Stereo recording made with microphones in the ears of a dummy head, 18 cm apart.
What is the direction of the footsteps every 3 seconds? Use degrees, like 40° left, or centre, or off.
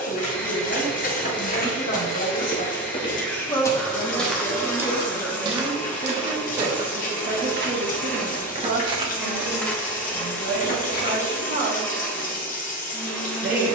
50° left, 10° right, 40° right, 20° left, off.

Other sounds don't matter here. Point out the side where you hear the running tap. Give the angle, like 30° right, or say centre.
40° left.